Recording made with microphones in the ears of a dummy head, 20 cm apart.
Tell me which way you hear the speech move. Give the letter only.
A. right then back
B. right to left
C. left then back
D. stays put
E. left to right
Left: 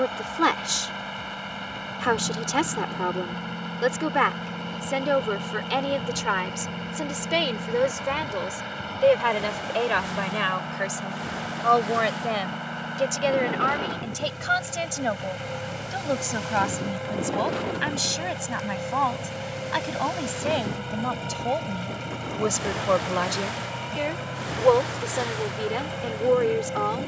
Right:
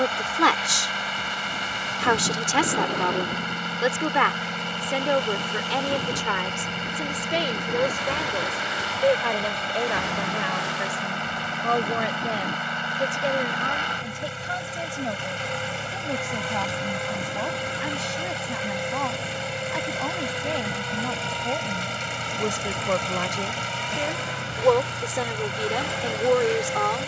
C.